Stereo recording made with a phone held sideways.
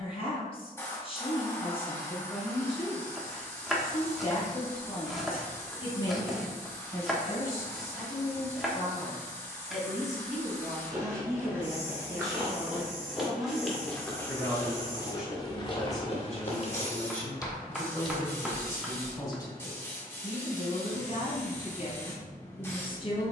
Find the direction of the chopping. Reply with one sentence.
In this clip you hear the chopping in the centre.